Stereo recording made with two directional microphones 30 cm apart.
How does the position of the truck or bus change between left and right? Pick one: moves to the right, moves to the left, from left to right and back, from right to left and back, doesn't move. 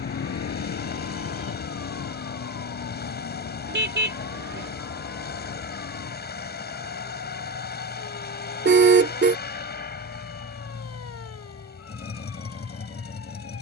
doesn't move.